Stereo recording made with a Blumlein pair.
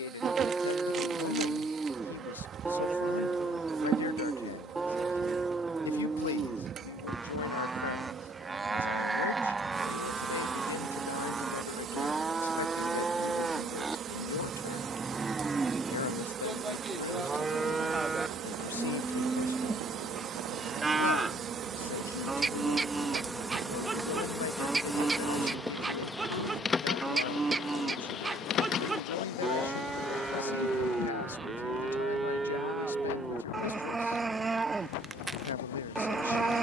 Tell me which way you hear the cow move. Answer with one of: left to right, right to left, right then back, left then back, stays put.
stays put.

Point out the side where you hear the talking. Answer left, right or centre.
left.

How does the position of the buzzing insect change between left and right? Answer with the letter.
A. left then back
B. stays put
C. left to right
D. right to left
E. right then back
D.